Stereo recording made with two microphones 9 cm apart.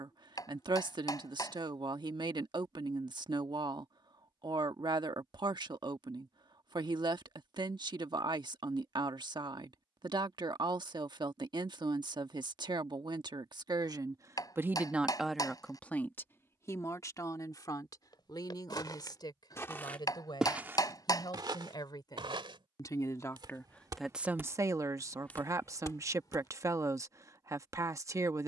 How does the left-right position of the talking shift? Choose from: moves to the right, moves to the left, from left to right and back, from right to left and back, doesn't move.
from right to left and back.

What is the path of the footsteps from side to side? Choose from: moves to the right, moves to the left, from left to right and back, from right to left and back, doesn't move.
from left to right and back.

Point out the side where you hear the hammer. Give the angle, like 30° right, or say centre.
40° left.